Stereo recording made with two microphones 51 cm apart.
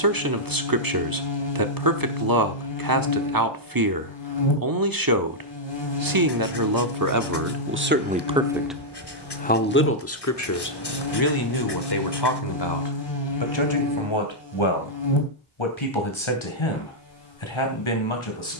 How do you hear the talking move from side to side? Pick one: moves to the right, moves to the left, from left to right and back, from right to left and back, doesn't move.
moves to the left.